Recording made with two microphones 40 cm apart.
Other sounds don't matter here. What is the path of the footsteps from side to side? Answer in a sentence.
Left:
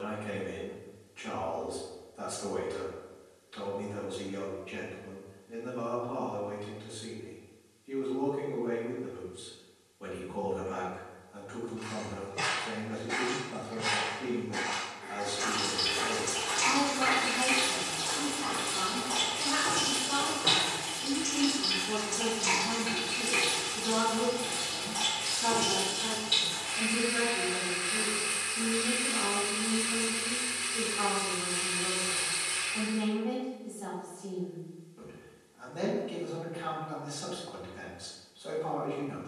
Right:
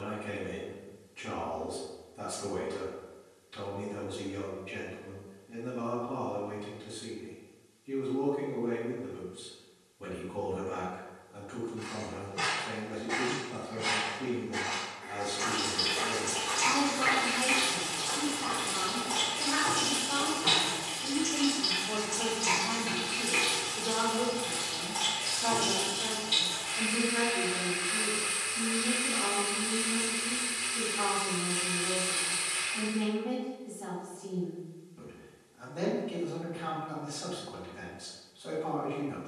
You can hear the footsteps go left and come back.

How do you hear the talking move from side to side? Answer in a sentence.
In this clip you hear the talking move from right to left and back again.